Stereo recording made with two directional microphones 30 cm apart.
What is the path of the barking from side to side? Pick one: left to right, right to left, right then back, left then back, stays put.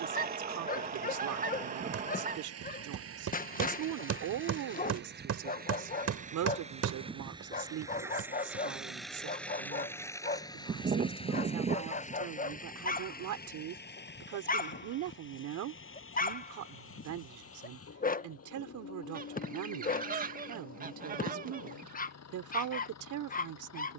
stays put.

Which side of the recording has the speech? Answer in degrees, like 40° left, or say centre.
70° right.